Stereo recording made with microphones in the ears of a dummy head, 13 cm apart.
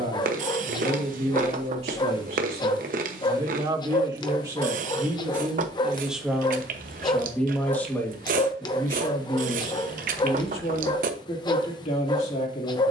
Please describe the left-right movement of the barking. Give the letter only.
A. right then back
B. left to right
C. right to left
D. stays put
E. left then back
D.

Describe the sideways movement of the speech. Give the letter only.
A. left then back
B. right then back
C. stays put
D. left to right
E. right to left
E.